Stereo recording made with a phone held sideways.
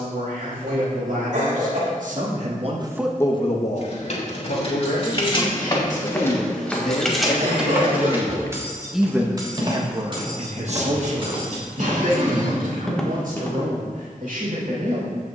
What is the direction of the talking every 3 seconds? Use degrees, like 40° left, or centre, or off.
70° right, 60° left, 40° left, 40° right, 70° right.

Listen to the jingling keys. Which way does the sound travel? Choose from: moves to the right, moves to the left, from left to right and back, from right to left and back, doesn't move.
moves to the right.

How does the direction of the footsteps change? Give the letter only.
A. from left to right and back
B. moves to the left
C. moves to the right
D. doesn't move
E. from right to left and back
A.